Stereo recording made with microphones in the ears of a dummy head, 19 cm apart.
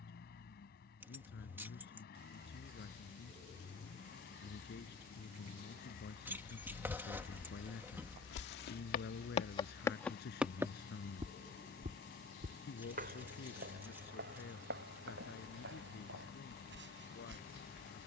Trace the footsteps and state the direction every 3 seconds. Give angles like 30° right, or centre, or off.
off, off, 60° left, 10° right, 50° right, 60° right.